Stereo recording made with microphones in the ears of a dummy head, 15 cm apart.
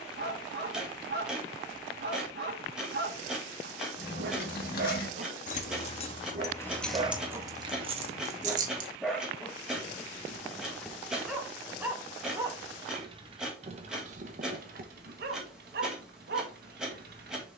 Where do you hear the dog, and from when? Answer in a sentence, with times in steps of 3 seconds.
You can hear the dog on the right from 0 s, in the centre from 9 s and on the right from 12 s.